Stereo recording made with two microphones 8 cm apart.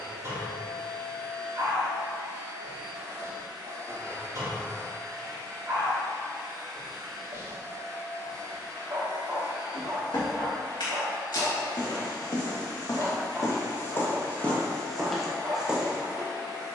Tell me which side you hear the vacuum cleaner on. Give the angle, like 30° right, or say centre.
70° right.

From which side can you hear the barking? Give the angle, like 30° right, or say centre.
40° right.